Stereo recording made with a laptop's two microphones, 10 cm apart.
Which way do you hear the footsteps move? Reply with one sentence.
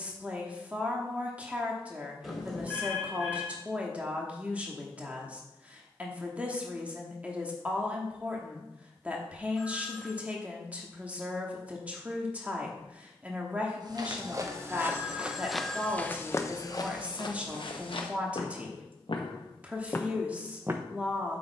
You can hear the footsteps go left and come back.